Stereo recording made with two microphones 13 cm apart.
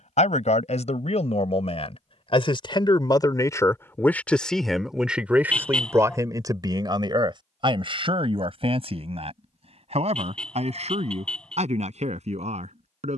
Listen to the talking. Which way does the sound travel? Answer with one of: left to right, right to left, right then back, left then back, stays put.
left to right.